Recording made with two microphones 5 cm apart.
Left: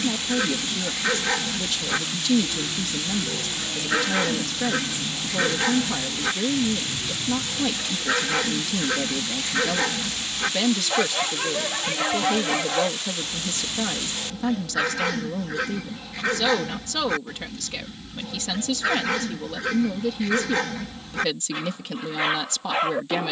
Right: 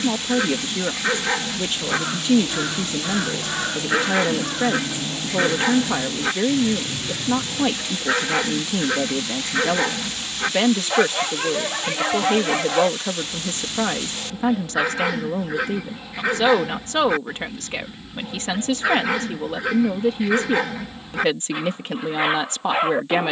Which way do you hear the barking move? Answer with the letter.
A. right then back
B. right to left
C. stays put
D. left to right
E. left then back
C.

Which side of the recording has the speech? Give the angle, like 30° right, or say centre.
30° right.